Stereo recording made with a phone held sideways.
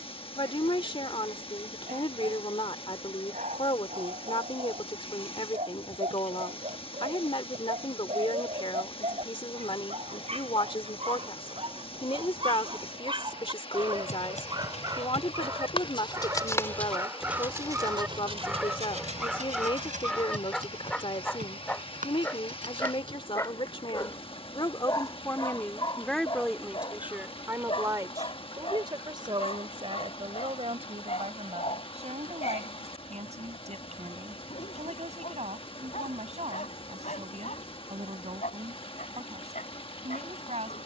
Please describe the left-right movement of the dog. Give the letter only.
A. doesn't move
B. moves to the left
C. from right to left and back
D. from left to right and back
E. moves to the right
B.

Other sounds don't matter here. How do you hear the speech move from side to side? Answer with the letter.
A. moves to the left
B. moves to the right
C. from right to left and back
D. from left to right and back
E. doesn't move
B.